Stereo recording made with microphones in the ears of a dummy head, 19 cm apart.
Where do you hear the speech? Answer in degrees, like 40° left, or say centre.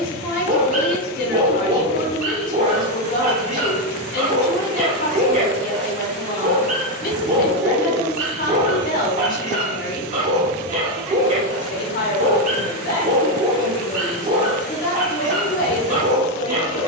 40° left.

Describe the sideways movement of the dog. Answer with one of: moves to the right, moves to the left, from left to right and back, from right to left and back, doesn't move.
doesn't move.